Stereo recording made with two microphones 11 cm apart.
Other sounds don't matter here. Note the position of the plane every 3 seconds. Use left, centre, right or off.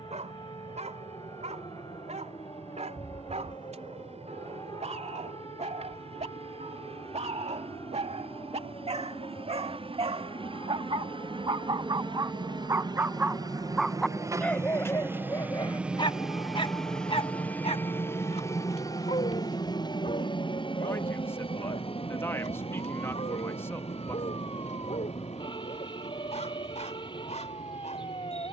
right, right, right, right, right, centre, left, left, left, left.